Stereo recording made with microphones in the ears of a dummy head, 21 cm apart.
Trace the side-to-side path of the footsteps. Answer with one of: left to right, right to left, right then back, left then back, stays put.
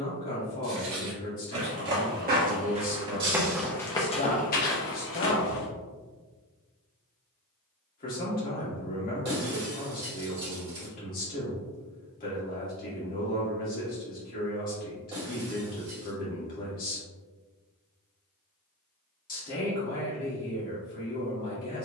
right to left.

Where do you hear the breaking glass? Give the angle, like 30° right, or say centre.
20° right.